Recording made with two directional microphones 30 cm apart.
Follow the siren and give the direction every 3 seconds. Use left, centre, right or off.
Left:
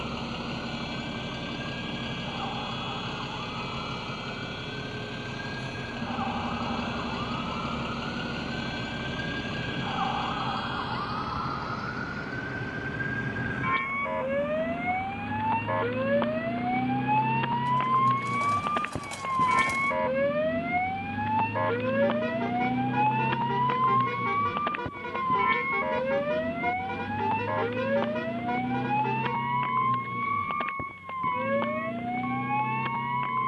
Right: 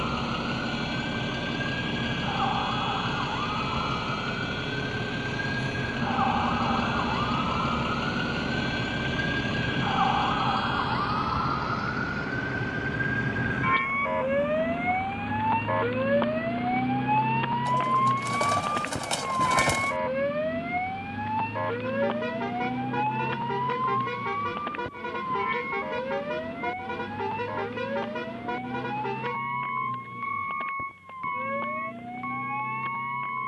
right, right, right, right, right, centre, centre, left, left, left, left.